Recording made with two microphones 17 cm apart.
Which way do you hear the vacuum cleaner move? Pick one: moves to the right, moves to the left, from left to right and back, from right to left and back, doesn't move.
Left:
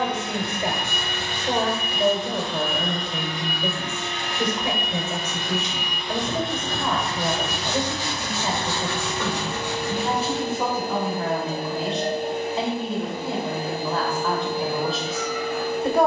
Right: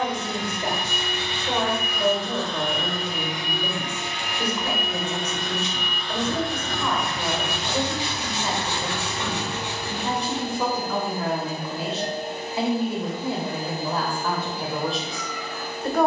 from left to right and back.